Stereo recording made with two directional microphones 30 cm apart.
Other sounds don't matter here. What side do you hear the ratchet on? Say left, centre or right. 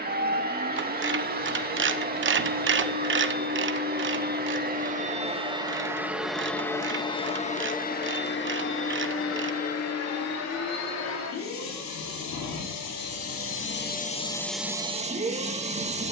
right.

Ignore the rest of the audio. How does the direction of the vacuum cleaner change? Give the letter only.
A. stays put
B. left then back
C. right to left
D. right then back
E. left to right
B.